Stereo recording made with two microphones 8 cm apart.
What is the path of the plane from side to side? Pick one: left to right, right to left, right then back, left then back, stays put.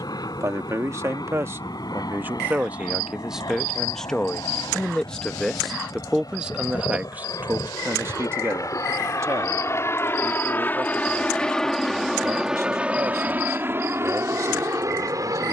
left to right.